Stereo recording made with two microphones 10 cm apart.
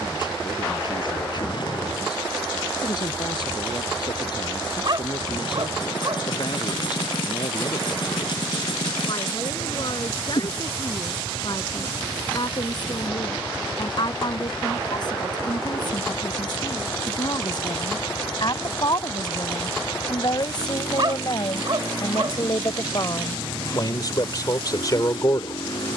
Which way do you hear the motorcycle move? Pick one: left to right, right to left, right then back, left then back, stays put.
stays put.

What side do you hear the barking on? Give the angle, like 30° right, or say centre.
50° right.